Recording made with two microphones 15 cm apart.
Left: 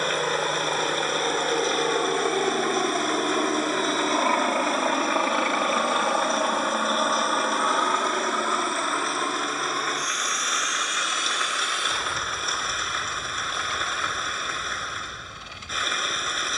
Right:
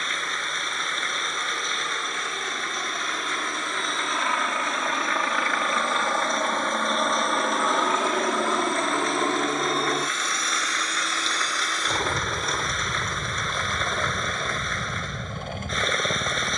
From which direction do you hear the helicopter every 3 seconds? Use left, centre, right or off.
left, left, centre, right, right, right.